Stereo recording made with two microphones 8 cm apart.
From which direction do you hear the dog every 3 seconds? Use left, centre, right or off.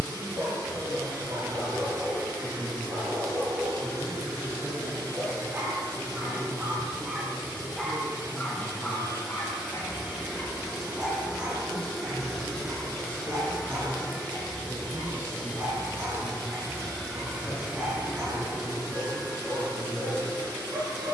right, right, centre, centre, right, right, right.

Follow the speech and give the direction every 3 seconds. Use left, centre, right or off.
right, right, right, centre, left, left, left.